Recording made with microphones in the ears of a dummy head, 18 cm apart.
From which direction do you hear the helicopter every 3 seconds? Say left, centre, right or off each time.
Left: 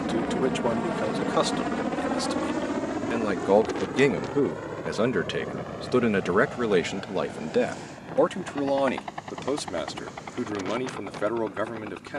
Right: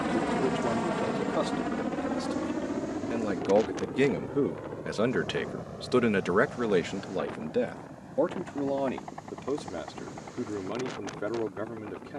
centre, left, left, left.